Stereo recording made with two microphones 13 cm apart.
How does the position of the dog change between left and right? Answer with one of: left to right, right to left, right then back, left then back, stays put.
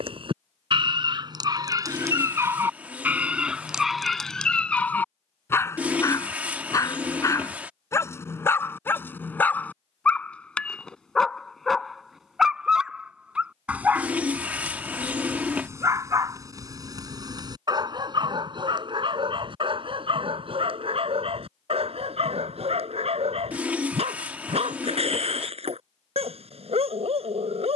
left then back.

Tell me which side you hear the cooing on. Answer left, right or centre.
centre.